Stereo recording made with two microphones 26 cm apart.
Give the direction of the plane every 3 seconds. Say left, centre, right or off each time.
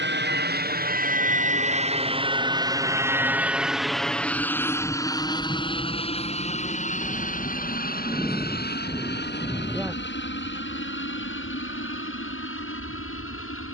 right, centre, left, left, left.